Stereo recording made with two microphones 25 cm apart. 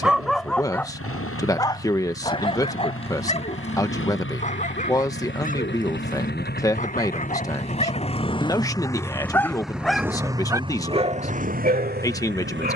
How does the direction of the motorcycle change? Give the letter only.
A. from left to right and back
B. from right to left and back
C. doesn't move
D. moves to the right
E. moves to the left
D.